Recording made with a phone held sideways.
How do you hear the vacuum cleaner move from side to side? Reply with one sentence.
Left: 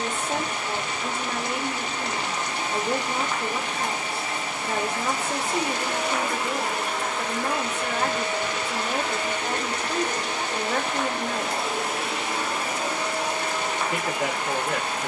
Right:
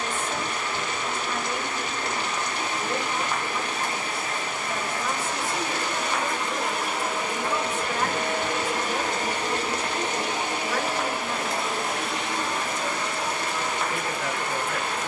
You can hear the vacuum cleaner go right and come back.